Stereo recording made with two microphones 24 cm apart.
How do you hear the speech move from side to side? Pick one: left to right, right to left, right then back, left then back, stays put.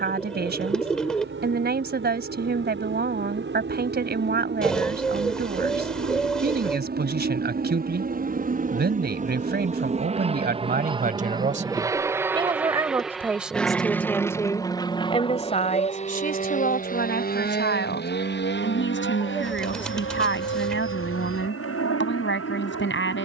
right to left.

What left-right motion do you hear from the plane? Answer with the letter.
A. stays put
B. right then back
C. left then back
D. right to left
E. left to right
D.